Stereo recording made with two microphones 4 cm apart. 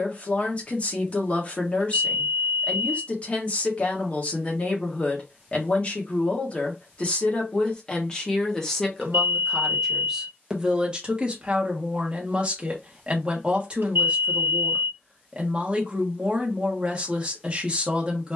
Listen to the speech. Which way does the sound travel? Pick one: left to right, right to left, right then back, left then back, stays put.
left to right.